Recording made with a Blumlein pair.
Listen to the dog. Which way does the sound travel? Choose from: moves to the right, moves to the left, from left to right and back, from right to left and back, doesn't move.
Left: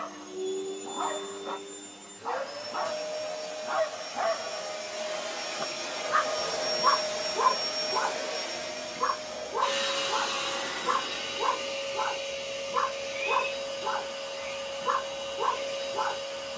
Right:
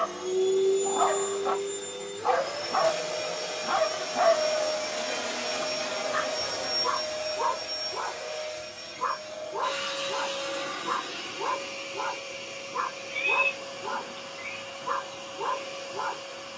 moves to the left.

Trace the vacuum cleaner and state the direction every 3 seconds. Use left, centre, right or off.
right, right, left, left, left, left.